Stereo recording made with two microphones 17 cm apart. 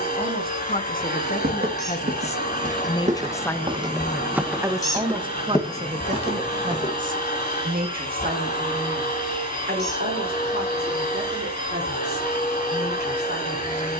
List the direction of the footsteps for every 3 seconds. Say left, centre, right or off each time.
right, centre, left, off, off.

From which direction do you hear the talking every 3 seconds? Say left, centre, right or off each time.
left, centre, right, right, right.